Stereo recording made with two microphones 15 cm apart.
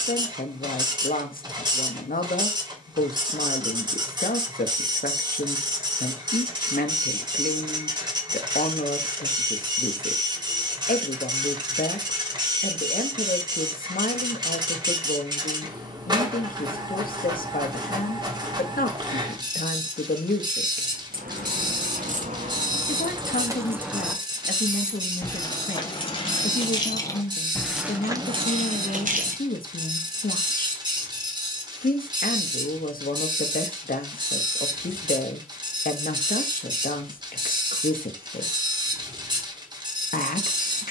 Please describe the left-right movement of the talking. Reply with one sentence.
In this clip you hear the talking stay in one place.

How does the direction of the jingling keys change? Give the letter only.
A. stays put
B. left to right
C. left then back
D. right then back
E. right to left
C.